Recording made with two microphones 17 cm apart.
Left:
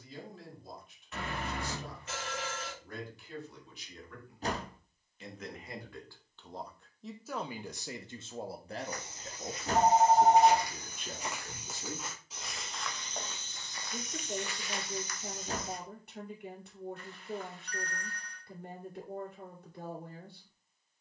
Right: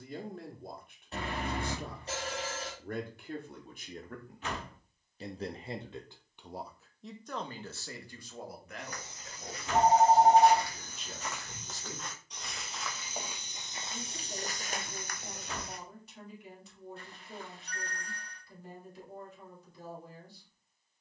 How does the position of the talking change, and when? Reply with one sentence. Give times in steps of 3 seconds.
In this clip you hear the talking on the right from 0 s, in the centre from 6 s and on the left from 9 s.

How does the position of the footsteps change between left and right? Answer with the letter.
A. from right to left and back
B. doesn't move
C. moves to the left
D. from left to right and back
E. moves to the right
E.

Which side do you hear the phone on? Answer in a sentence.
In this clip you hear the phone on the right.